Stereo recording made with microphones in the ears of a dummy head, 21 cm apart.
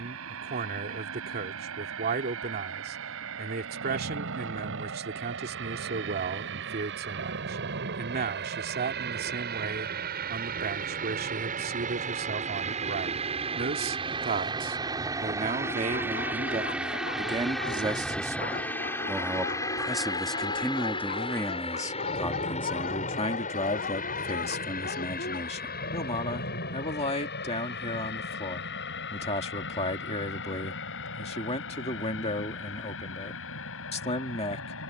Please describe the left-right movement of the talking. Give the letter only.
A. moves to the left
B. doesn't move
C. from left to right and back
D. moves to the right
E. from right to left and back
A.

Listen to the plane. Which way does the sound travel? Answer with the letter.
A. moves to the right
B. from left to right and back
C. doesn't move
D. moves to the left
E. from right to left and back
D.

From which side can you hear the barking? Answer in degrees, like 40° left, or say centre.
40° left.